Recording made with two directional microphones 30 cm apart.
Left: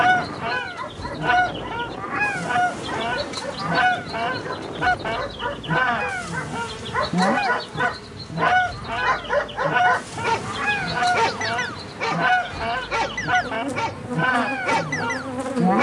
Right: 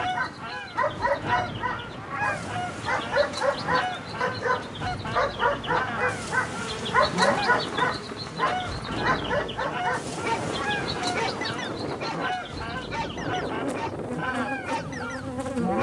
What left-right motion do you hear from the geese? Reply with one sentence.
In this clip you hear the geese stay put.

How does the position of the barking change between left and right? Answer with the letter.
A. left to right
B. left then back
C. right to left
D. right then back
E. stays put
C.